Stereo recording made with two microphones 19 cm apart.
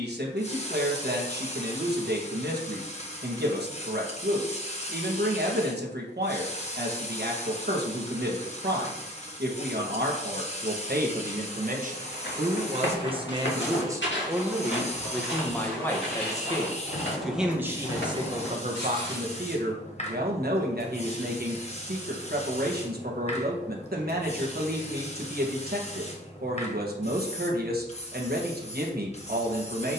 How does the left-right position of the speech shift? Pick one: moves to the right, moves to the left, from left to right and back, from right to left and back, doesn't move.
from right to left and back.